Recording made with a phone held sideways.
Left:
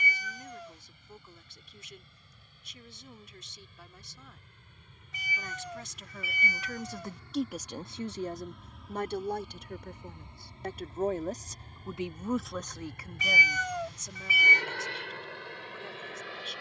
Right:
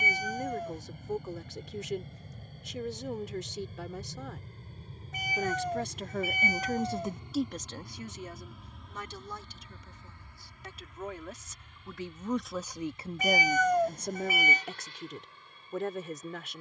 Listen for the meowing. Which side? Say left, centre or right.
right.